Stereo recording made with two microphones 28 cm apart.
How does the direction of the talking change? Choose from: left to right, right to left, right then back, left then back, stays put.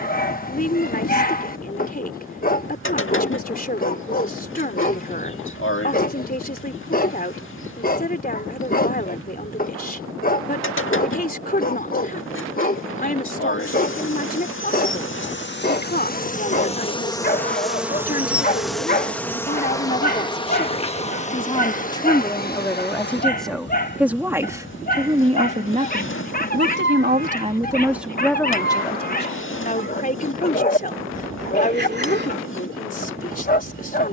right then back.